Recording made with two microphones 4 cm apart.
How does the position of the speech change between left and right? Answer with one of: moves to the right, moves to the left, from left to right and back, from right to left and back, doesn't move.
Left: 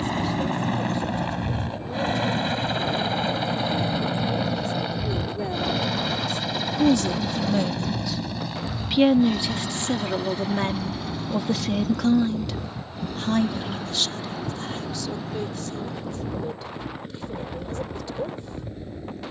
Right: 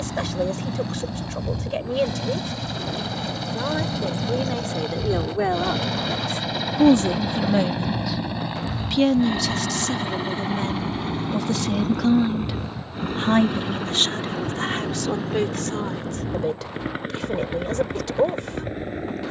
from right to left and back.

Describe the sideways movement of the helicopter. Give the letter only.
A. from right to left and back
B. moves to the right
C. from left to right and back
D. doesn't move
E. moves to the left
B.